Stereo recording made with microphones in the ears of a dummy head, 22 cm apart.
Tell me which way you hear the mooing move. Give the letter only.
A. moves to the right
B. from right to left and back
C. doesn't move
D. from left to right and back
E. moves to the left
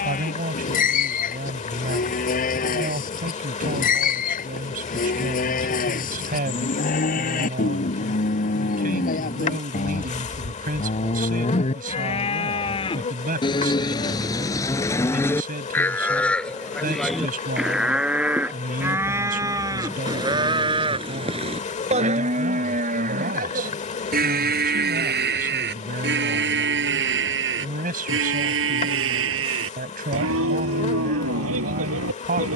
A.